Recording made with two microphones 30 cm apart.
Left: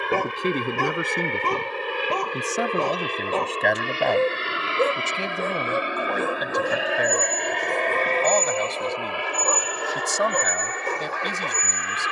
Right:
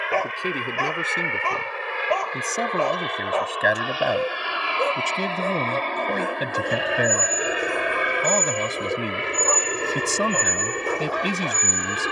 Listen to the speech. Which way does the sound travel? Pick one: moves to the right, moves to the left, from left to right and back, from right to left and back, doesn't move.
moves to the right.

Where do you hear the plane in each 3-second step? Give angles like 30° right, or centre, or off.
40° left, 20° left, 10° right, 30° right.